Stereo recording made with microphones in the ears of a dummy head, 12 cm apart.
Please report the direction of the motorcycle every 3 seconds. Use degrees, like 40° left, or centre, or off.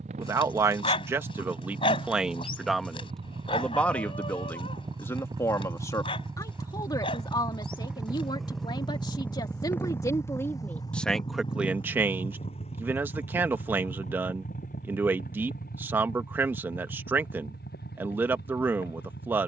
50° right, 30° right, 10° right, 20° left, 50° left, 60° left, 70° left.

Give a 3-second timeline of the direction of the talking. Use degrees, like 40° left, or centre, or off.
10° right, 20° left, 30° left, 20° left, 10° right, 10° right, 10° right.